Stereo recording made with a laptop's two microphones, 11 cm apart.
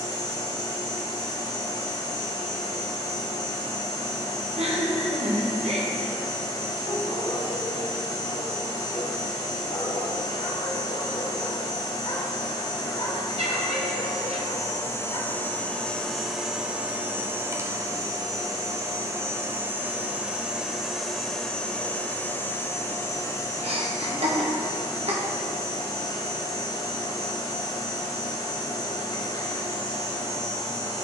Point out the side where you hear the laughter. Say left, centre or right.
right.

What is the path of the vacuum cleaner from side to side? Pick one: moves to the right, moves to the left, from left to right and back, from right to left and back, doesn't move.
from left to right and back.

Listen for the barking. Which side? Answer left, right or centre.
left.